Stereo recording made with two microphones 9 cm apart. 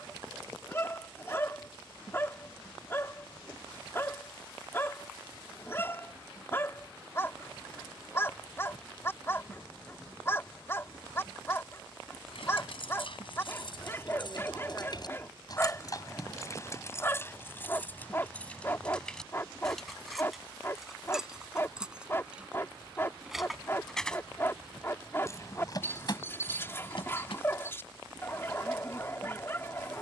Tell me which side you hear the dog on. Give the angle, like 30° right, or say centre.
30° left.